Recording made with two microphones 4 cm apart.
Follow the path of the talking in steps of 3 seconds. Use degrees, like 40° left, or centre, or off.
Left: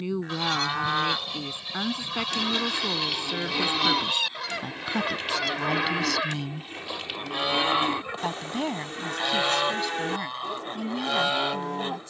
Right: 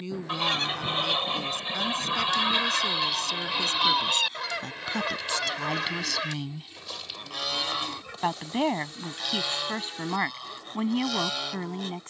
20° left, 10° left, 10° right, 30° right.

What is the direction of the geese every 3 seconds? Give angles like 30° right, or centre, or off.
30° right, centre, 20° left, 30° left.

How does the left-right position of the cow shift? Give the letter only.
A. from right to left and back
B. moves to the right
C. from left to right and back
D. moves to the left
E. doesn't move
E.